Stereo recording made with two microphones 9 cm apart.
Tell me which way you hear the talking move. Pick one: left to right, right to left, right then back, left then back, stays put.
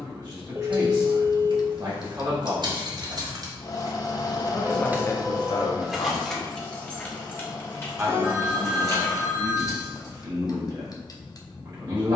left then back.